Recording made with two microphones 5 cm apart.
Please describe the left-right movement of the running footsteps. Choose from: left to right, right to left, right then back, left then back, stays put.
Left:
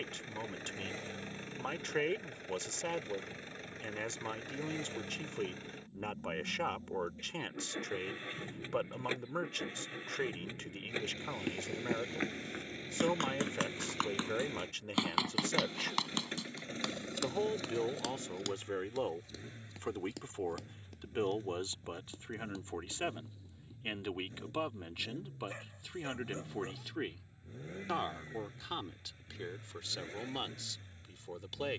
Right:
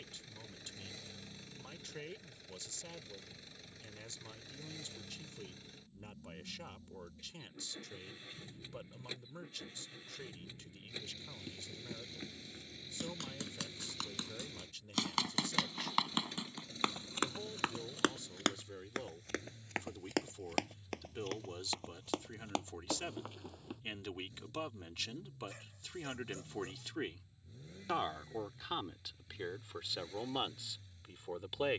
left to right.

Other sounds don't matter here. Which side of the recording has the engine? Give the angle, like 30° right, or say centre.
50° left.